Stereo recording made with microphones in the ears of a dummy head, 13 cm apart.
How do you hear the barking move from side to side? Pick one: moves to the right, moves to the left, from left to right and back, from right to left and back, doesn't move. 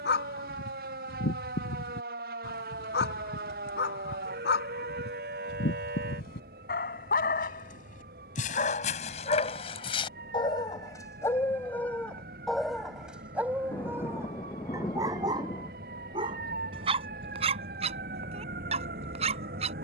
moves to the right.